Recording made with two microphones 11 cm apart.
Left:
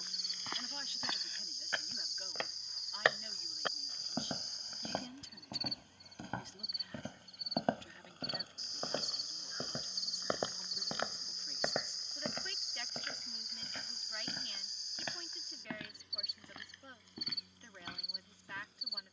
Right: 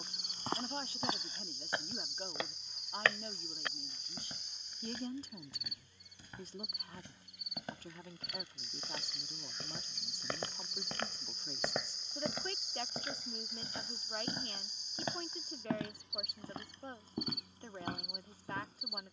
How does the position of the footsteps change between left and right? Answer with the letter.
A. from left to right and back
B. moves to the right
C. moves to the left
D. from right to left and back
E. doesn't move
D.